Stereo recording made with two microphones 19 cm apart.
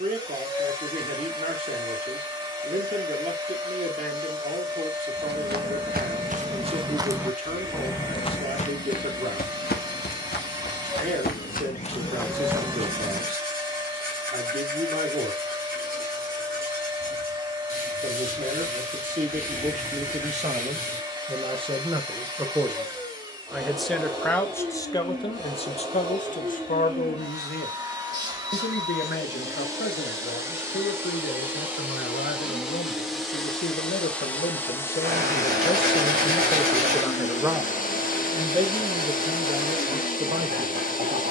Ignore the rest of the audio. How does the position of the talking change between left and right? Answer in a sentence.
In this clip you hear the talking go left and come back.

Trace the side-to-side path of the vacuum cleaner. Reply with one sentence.
In this clip you hear the vacuum cleaner move to the left.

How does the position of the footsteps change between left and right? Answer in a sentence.
You can hear the footsteps go left and come back.